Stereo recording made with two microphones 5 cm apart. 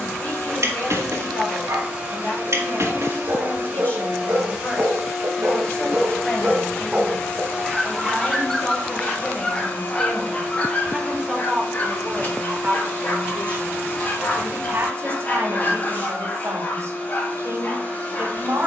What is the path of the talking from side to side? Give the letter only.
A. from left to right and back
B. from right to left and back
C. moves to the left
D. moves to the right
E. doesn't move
D.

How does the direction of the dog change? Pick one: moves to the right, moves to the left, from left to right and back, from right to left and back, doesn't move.
moves to the left.